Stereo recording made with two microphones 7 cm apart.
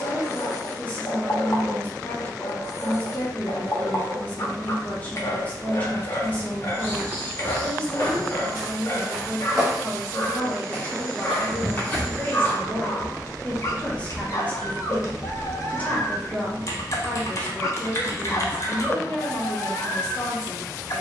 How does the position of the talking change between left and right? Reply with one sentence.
In this clip you hear the talking stay put.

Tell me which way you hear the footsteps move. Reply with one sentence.
In this clip you hear the footsteps go right and come back.